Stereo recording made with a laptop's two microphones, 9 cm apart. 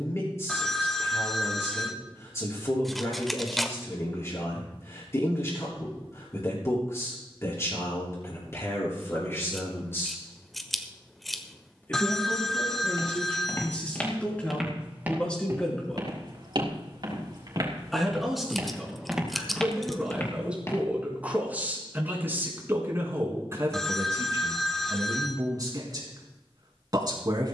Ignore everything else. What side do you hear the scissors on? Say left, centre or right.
centre.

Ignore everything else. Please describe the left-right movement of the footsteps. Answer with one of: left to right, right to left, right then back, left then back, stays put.
right then back.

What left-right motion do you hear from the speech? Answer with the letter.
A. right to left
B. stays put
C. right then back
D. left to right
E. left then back
D.